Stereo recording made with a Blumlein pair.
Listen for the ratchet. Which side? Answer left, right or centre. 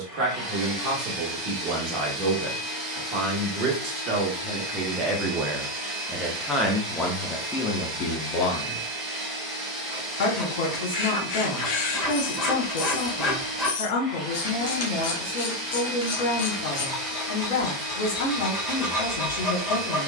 left.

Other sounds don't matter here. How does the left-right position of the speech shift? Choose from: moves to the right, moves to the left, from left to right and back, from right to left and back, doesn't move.
moves to the left.